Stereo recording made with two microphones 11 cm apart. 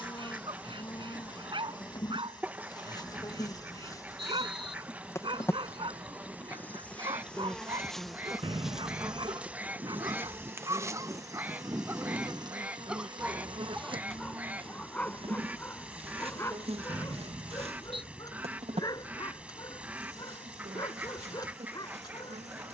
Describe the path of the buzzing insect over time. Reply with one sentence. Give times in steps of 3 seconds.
In this clip you hear the buzzing insect on the left from 0 s, in the centre from 6 s and on the right from 9 s.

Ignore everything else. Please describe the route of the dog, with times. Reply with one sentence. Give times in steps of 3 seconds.
You can hear the dog on the right from 0 s, in the centre from 12 s and on the left from 15 s.